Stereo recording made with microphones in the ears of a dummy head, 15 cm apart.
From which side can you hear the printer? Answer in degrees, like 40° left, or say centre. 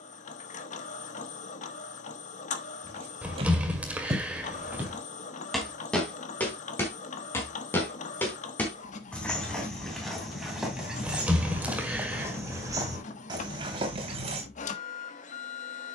40° left.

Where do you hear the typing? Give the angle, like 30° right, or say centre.
10° right.